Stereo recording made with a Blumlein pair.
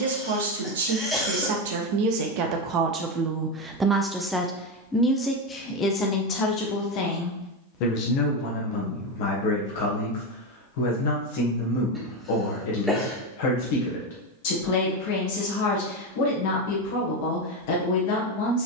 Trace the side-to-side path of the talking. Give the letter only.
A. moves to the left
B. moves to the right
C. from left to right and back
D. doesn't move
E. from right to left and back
A.